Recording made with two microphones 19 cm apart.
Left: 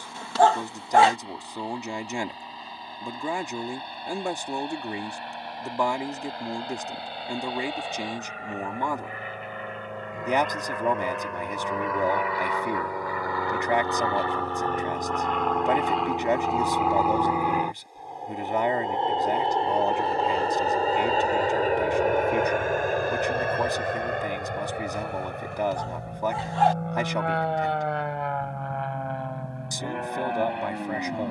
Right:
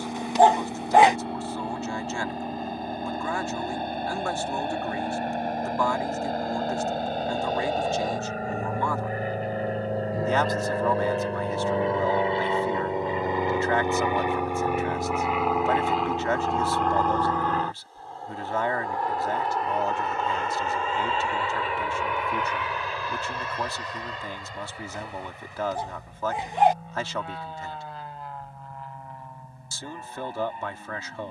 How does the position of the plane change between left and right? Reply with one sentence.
In this clip you hear the plane move to the left.